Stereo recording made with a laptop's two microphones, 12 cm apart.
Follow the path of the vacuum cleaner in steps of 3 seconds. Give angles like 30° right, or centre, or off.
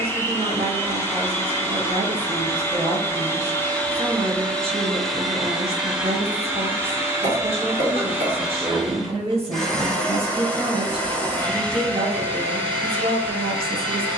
20° left, 10° left, 10° right, 10° left, 10° left.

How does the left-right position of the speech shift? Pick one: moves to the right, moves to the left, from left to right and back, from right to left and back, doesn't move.
doesn't move.